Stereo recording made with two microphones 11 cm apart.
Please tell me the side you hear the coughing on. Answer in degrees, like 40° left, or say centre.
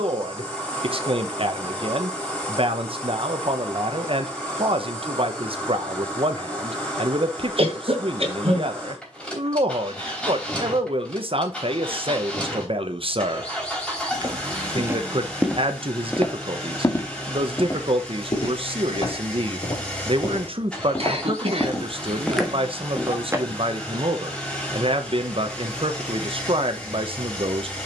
60° right.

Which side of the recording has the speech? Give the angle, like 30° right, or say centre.
50° right.